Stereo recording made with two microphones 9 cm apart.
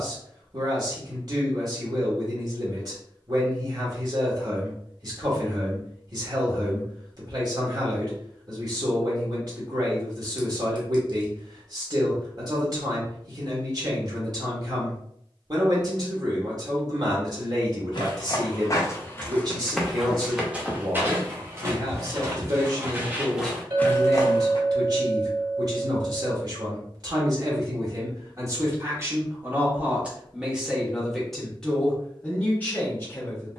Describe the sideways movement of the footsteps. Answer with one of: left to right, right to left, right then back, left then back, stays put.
right then back.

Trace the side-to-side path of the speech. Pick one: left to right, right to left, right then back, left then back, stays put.
right to left.